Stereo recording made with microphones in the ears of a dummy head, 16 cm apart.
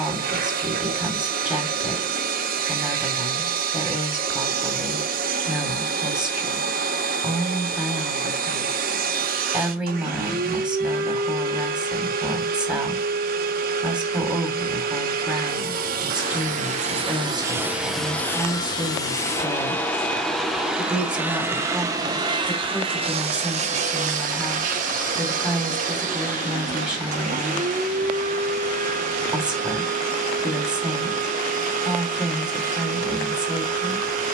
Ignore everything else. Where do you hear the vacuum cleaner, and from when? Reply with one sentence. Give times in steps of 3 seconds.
In this clip you hear the vacuum cleaner on the right from 0 s, in the centre from 18 s and on the right from 21 s.